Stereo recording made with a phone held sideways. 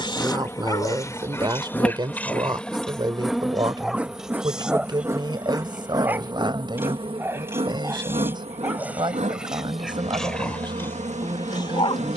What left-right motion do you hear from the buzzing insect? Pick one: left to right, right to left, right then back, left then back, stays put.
left to right.